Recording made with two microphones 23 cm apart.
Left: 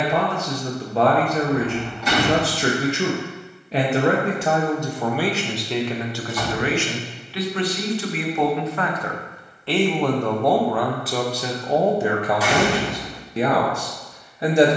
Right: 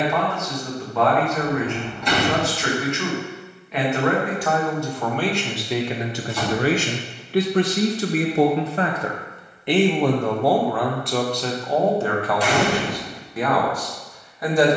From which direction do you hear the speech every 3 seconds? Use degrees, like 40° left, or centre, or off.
30° left, 20° left, 40° right, centre, 20° left.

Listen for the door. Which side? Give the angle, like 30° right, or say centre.
centre.